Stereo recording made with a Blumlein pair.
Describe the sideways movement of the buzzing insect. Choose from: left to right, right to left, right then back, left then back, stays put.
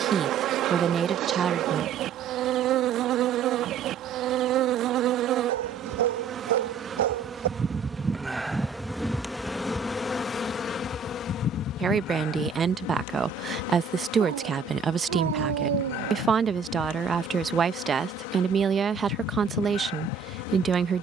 right to left.